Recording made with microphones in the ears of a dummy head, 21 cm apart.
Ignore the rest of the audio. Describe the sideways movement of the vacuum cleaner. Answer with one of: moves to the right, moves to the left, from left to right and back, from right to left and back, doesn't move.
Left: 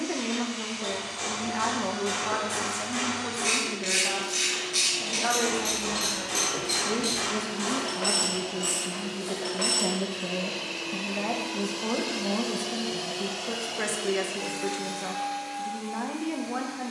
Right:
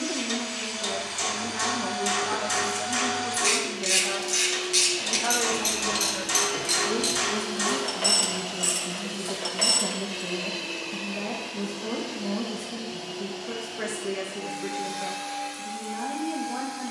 from right to left and back.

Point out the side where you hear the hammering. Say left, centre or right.
right.